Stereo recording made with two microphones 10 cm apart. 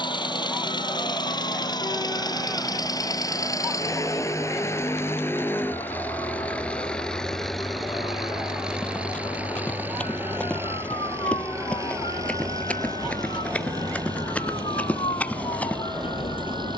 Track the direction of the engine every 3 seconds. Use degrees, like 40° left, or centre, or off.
50° left, 30° left, centre, 20° right, 40° right, 50° right.